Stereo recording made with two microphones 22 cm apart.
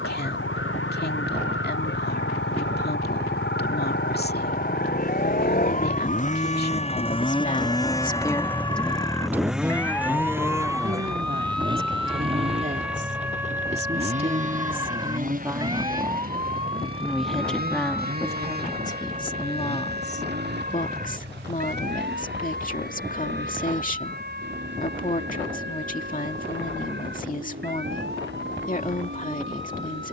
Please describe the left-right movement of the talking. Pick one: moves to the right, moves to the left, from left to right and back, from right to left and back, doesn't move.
from left to right and back.